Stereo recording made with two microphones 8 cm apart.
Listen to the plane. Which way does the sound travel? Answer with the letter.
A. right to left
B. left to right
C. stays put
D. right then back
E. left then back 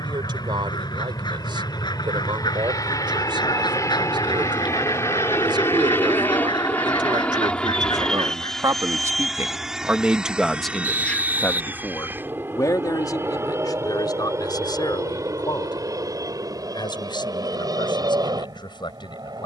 B.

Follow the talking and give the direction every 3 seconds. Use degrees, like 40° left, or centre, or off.
80° right, 70° right, 60° right, centre, 50° left, 70° left, 70° left.